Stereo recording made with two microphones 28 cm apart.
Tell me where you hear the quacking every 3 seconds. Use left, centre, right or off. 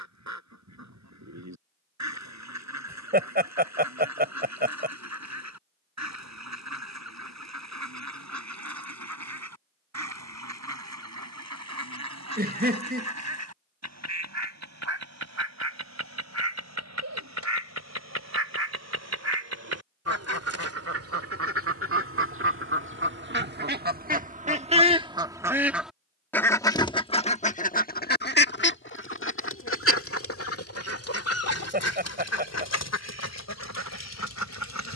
right, right, right, right, right, right, right, right, centre, left, left, left.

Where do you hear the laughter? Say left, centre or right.
right.